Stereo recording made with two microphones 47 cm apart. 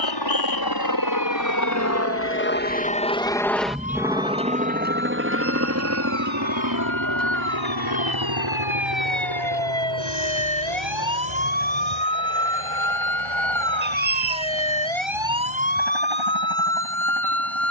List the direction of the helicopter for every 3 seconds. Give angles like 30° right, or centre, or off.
40° left, 10° right, 40° right, 60° right, 60° right, 70° right.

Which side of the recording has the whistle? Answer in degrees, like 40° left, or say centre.
40° right.